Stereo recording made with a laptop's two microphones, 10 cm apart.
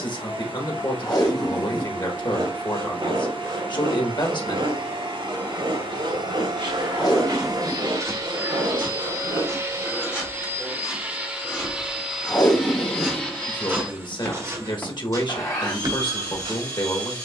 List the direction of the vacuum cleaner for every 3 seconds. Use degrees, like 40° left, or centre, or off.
60° right, 60° right, 50° right, 20° right, 20° left, 40° left.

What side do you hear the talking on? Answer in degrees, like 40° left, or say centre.
50° left.